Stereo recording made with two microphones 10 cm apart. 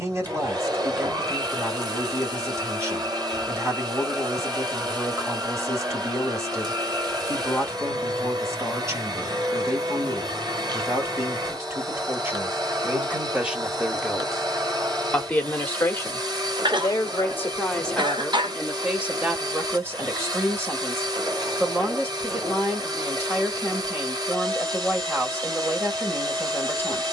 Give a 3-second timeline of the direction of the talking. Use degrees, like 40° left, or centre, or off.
30° right, 30° right, 30° right, 30° right, 10° right, 20° left, 10° right, 20° right, 20° right.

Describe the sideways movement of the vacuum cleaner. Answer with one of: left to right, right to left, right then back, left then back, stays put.
stays put.